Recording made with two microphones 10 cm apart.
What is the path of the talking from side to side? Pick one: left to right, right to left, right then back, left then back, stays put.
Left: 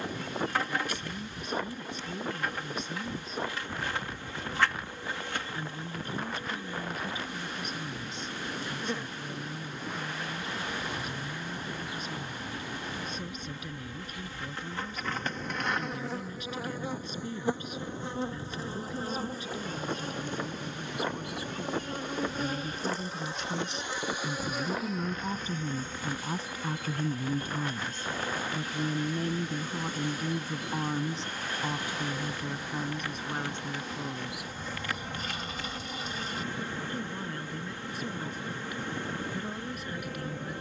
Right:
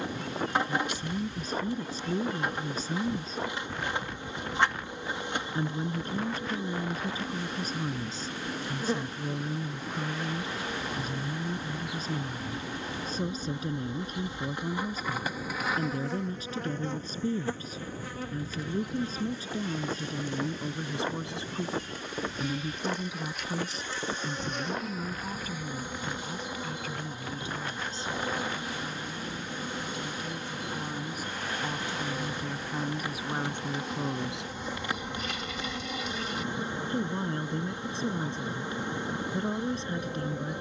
left then back.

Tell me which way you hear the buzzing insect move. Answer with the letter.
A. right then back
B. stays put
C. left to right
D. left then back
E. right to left
D.